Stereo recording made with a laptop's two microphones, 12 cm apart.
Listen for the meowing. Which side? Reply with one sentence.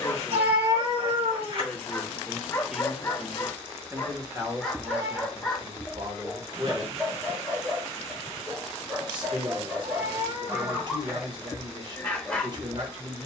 In this clip you hear the meowing on the right.